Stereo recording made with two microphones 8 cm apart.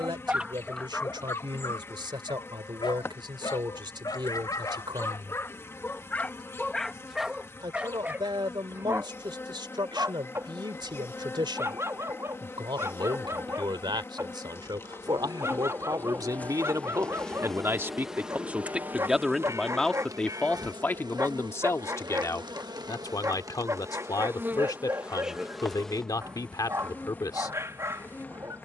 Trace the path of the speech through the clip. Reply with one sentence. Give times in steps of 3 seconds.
You can hear the speech on the right from 0 s, in the centre from 18 s and on the left from 21 s.